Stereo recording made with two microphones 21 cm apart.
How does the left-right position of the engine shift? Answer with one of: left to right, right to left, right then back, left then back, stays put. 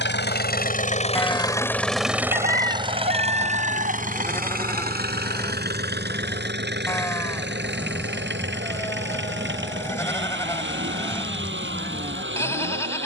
left to right.